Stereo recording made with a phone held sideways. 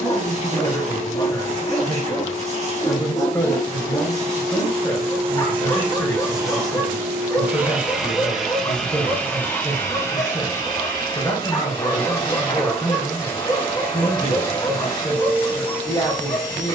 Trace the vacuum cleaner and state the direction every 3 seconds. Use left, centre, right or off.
right, right, centre, left, left, left.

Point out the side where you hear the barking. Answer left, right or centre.
left.